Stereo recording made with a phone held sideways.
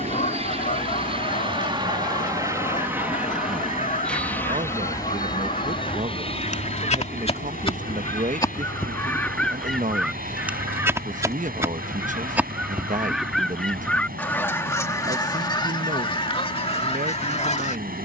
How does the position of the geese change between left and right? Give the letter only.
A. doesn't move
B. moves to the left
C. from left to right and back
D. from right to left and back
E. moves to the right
C.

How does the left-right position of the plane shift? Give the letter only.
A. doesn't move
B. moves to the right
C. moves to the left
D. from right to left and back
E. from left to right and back
C.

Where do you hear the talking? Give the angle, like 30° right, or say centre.
60° right.